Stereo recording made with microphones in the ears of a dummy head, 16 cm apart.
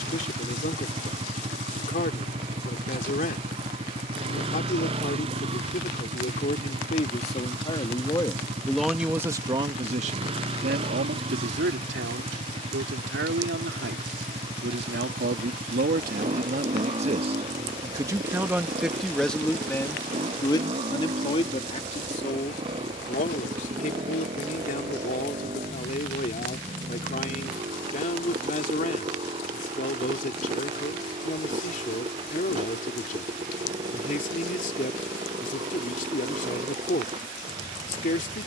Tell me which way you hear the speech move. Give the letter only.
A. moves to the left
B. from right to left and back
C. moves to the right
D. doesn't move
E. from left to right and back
E.